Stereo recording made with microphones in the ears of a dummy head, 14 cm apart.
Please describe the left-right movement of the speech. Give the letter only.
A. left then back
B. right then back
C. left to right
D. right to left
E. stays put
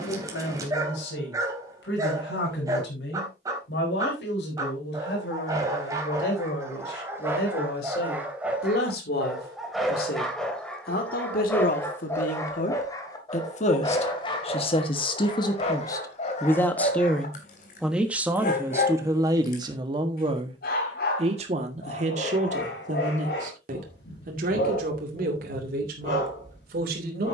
C.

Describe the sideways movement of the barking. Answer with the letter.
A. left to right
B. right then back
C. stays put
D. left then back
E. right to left
E.